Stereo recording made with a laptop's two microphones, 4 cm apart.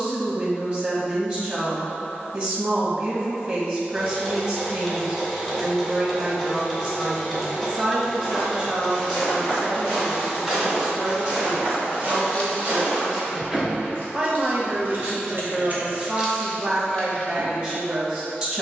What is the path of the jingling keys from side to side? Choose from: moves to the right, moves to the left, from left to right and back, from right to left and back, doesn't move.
from left to right and back.